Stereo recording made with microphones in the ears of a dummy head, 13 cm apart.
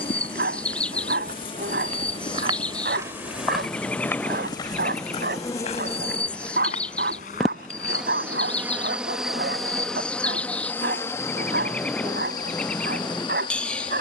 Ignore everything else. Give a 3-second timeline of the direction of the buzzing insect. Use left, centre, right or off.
left, left, centre, centre, left.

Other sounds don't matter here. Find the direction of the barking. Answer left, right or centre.
right.